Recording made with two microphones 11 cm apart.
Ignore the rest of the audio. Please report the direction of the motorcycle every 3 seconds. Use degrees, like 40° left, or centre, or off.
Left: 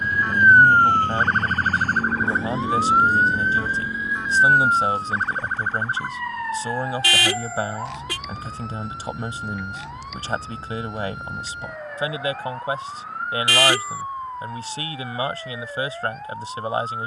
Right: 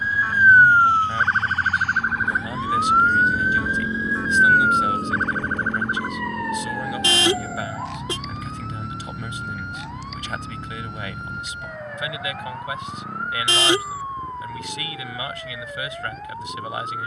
50° left, 40° right, 70° right, 80° right, 80° right, 80° right.